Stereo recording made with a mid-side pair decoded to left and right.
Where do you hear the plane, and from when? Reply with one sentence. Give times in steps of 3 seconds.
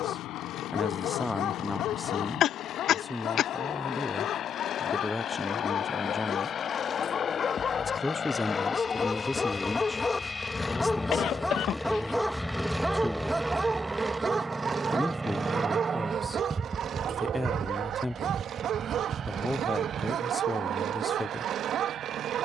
You can hear the plane on the left from 0 s, in the centre from 9 s and on the right from 15 s.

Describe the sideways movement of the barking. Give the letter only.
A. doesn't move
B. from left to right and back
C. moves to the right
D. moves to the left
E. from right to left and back
C.